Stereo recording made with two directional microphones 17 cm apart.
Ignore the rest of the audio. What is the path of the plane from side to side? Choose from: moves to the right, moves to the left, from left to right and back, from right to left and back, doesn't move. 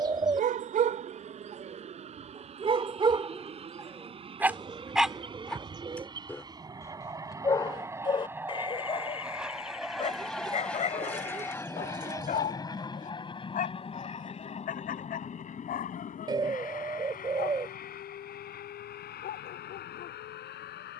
moves to the left.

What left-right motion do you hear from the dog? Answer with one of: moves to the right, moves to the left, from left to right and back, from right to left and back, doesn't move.
moves to the left.